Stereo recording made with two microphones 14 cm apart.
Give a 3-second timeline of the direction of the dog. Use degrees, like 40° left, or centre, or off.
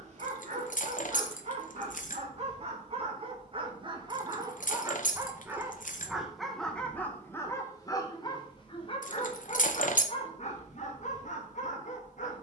50° right, 30° right, 20° left, 50° left.